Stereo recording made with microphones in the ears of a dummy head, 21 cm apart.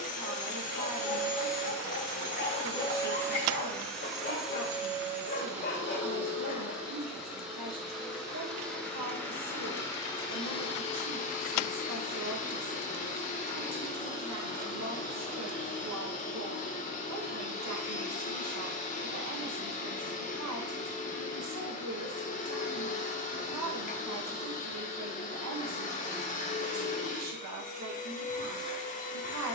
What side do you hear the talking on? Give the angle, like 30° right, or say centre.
80° right.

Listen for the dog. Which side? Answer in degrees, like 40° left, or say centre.
50° left.